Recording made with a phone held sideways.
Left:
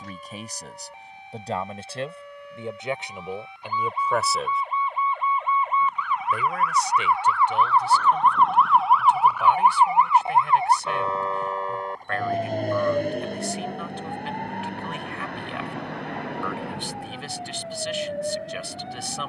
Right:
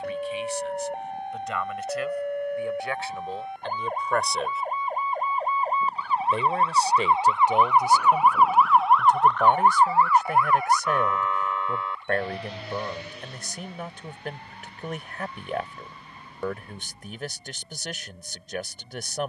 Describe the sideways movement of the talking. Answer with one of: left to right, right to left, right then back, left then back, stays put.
left to right.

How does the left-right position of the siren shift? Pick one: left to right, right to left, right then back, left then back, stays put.
right to left.